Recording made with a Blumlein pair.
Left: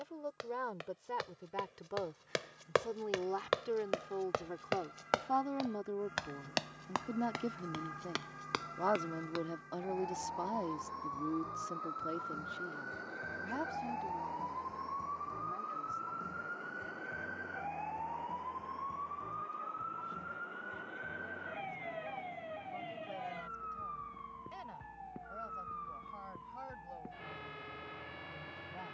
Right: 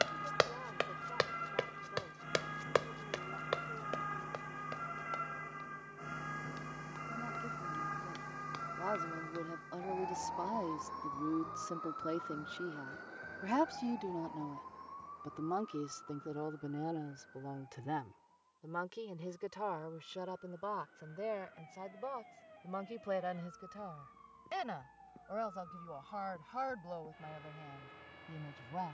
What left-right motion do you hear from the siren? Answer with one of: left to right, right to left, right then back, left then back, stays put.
right to left.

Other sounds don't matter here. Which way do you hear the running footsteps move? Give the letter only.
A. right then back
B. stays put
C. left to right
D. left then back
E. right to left
E.